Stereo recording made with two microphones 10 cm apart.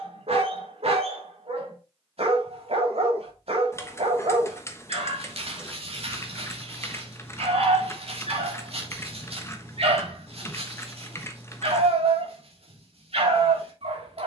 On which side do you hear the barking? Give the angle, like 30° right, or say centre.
70° right.